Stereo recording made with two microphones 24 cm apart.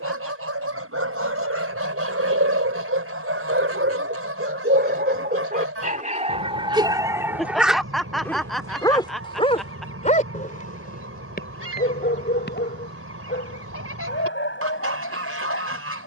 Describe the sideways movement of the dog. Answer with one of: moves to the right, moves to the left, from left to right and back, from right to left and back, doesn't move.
moves to the left.